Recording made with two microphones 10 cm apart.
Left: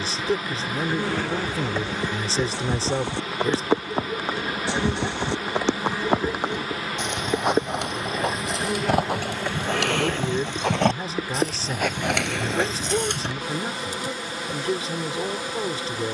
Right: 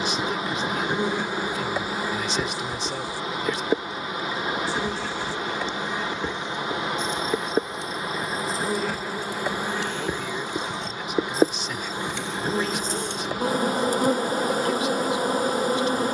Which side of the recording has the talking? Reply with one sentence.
In this clip you hear the talking on the left.